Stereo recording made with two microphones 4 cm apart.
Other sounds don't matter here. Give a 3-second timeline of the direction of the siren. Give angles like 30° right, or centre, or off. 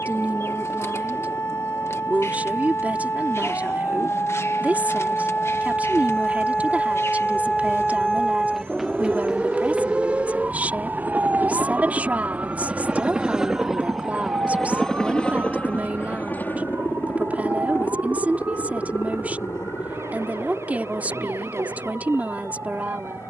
60° left, 40° left, 10° left, 20° right, 50° right, 60° right, 60° right, 70° right.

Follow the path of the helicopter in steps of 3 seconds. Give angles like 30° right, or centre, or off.
70° right, 60° right, 60° right, 40° right, 10° right, 40° left, 60° left, 70° left.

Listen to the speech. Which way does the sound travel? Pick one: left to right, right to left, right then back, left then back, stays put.
stays put.